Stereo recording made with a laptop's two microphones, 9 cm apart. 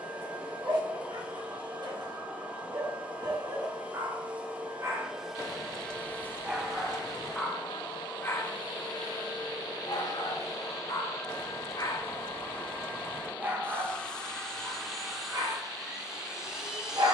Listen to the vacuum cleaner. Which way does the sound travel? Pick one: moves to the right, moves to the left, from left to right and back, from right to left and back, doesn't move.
from right to left and back.